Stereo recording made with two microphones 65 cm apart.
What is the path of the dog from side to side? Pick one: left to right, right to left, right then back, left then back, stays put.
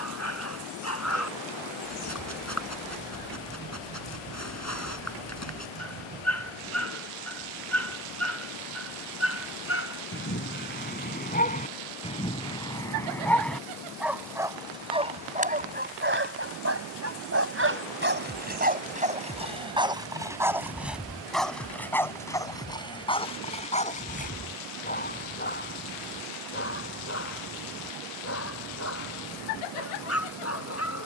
right then back.